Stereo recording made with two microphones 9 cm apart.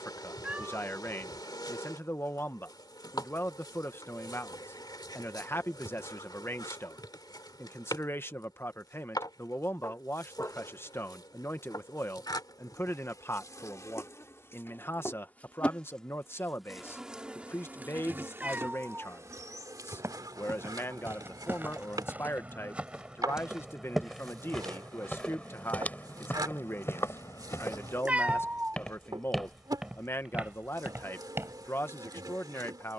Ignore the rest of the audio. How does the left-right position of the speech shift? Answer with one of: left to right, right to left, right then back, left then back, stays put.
stays put.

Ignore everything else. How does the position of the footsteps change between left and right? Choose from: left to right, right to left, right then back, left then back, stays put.
left then back.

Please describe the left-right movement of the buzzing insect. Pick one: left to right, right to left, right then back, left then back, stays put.
left to right.